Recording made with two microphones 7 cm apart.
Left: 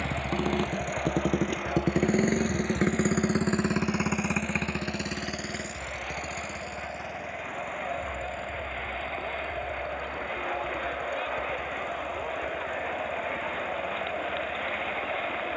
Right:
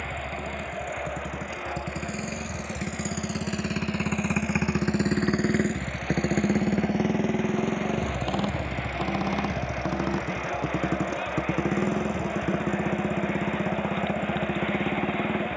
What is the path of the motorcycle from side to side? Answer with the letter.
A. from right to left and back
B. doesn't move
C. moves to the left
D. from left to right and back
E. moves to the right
E.